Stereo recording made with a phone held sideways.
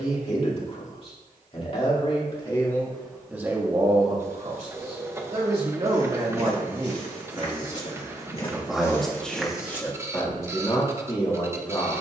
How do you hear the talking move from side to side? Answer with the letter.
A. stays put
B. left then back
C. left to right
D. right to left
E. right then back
E.